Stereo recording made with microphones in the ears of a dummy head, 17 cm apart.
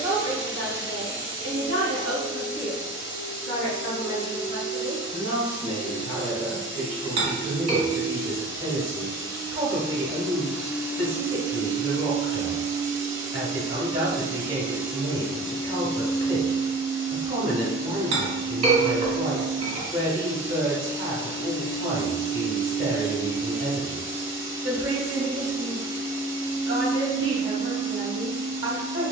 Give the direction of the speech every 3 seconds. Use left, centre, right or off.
left, left, centre, right, right, right, right, right, right, right.